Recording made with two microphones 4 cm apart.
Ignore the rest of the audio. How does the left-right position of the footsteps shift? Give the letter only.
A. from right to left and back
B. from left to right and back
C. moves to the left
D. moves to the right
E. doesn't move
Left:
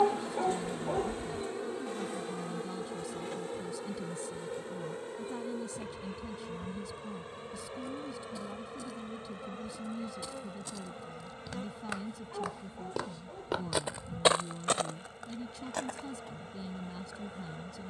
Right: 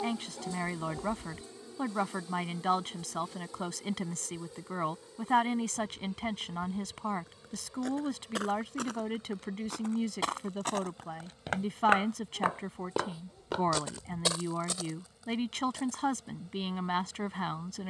C.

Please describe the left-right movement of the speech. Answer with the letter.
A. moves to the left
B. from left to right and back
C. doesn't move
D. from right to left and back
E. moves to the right
C.